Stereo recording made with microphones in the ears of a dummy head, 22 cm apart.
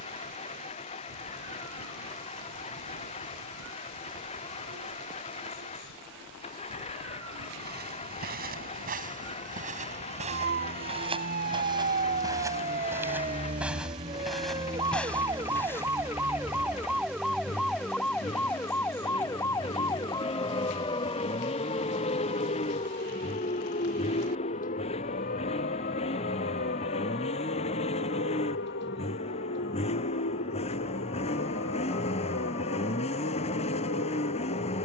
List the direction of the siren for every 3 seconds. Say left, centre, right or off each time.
right, right, right, right, right, centre, centre, left, left, left, left, left.